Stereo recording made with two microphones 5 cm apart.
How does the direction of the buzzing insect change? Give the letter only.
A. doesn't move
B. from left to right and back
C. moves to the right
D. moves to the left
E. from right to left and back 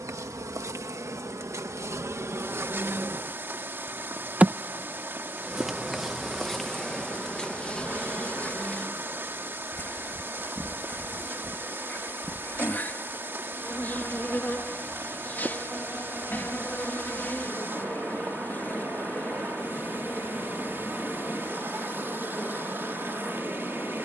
D.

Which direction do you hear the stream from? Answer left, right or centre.
right.